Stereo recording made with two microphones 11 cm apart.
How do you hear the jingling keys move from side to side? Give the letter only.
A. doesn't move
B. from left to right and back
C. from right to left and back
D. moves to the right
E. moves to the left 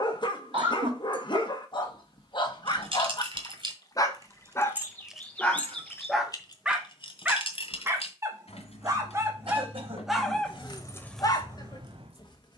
C.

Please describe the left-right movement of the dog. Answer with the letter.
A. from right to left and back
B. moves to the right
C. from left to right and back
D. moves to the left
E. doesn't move
C.